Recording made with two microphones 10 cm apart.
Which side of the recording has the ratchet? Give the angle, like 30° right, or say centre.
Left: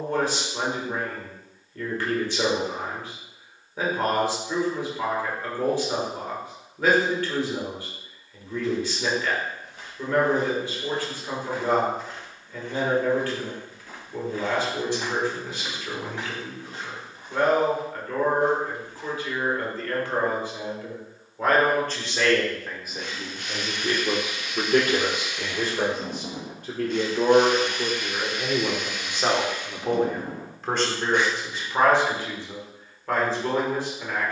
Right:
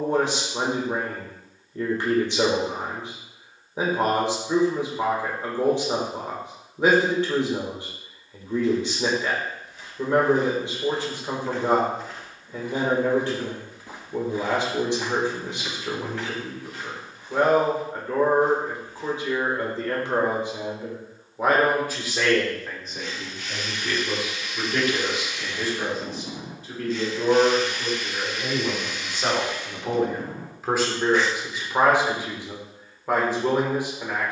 60° left.